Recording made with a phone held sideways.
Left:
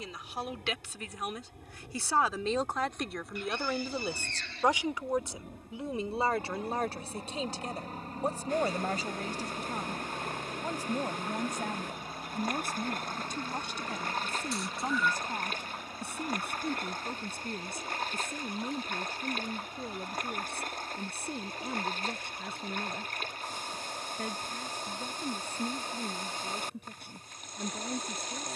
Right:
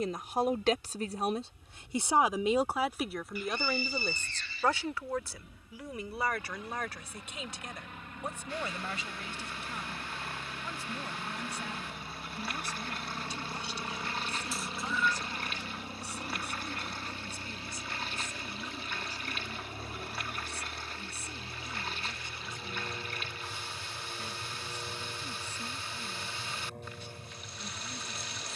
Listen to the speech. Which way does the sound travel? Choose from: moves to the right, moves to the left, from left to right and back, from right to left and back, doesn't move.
moves to the left.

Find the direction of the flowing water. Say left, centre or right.
left.